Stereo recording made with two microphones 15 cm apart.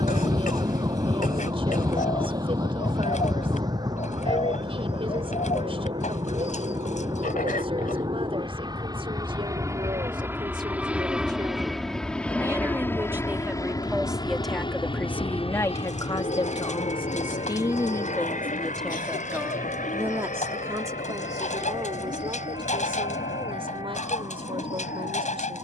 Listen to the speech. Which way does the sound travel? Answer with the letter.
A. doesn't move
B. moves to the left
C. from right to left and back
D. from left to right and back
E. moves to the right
C.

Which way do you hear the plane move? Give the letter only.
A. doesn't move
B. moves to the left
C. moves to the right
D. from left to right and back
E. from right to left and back
B.